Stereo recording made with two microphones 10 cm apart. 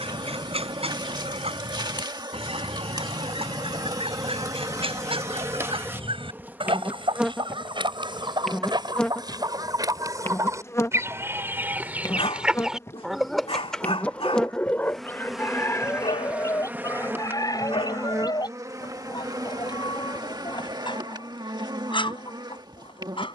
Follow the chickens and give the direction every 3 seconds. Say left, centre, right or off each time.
right, right, right, right, centre, left, left, left.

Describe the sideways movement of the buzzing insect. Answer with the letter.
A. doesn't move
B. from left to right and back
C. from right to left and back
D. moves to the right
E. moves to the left
C.